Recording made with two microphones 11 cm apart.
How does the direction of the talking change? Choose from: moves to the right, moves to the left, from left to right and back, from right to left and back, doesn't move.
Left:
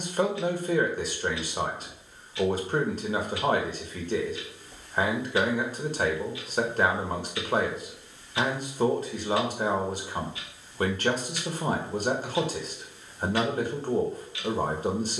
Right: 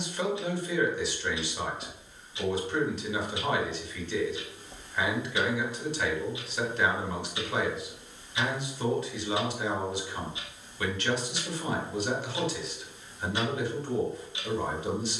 doesn't move.